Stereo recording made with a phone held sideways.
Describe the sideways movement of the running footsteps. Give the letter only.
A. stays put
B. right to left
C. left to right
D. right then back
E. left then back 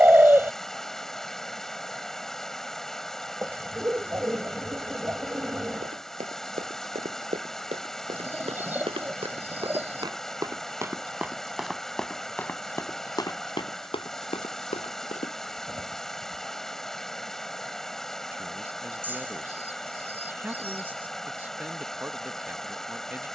B.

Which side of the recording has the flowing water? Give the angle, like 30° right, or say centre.
centre.